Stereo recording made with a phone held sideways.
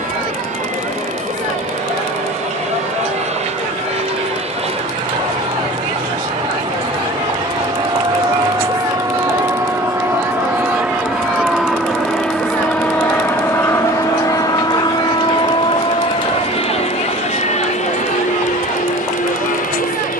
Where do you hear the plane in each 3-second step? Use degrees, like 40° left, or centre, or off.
50° right, 40° right, 30° right, 10° right, 10° left, 40° left, 50° left.